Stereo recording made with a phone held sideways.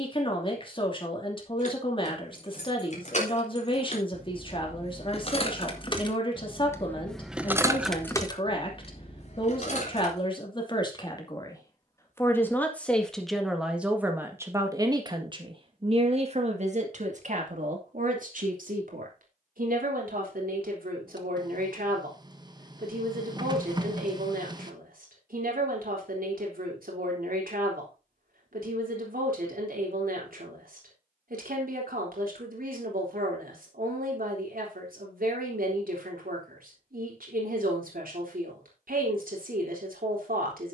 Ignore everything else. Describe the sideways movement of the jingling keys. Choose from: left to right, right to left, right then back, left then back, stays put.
right then back.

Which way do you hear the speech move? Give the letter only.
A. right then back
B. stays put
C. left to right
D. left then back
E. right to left
C.